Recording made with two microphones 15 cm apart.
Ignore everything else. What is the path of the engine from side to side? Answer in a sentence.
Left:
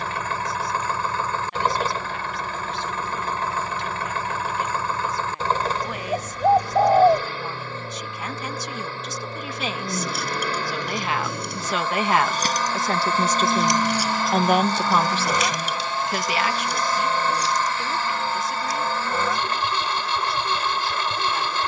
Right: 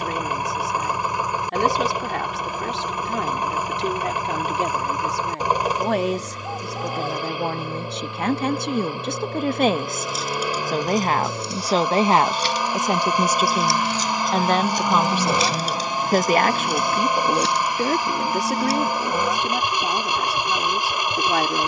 You can hear the engine stay in one place.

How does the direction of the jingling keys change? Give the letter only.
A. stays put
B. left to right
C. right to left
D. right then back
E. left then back
B.